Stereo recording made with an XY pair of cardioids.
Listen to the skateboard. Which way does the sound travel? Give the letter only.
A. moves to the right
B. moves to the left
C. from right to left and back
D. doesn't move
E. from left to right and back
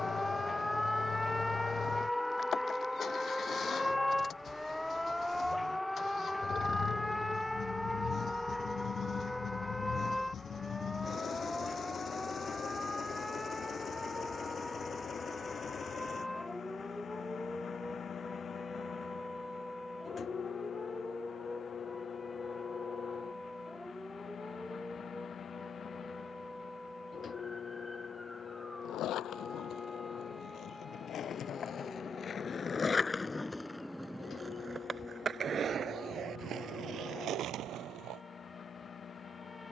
A.